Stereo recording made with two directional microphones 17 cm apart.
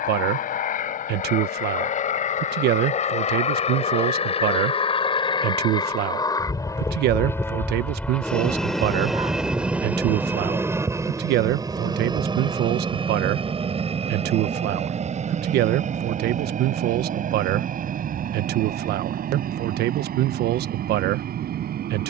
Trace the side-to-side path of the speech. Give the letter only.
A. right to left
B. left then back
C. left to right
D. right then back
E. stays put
E.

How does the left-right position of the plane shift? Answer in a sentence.
You can hear the plane move to the right.